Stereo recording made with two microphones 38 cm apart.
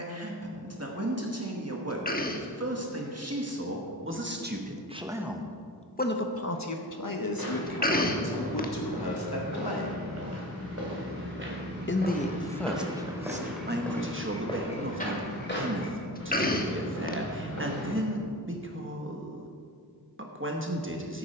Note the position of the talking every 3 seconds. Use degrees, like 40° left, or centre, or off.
40° right, 20° right, 60° left, 70° left, 20° right, 30° right, 30° right.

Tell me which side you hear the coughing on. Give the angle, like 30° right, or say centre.
20° left.